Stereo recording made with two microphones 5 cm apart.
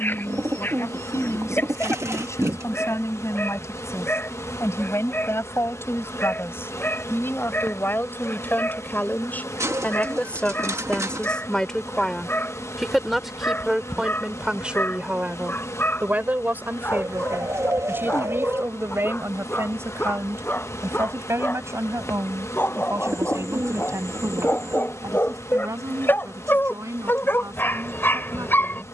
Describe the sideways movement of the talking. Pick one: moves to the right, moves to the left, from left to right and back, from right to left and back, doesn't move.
moves to the right.